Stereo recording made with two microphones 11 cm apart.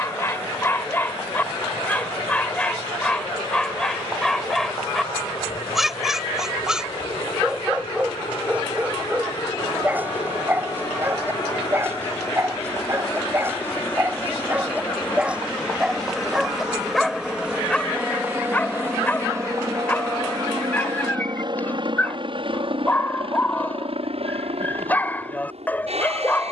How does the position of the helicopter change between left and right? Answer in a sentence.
You can hear the helicopter travel towards the right.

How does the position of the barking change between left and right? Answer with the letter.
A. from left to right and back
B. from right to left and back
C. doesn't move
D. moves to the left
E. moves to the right
A.